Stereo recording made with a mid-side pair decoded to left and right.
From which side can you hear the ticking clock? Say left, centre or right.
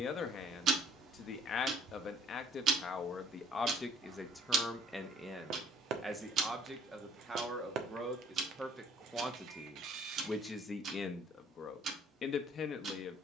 right.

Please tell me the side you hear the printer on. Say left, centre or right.
right.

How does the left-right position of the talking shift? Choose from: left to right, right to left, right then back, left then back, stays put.
right then back.